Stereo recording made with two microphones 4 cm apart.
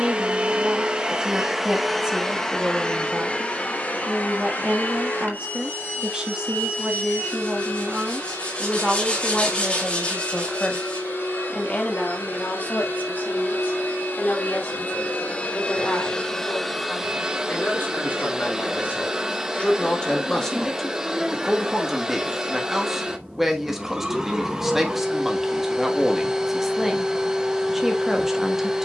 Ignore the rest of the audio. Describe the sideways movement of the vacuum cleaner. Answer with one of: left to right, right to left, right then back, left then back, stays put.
left then back.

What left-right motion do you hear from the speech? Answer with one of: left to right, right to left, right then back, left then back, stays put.
left then back.